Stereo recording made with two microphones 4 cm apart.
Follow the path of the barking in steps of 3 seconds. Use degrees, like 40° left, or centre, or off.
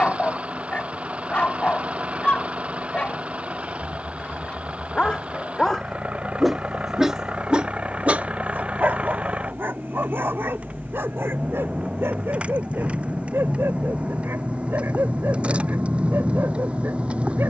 30° left, 20° left, 20° right, 60° right, 80° right, 80° right.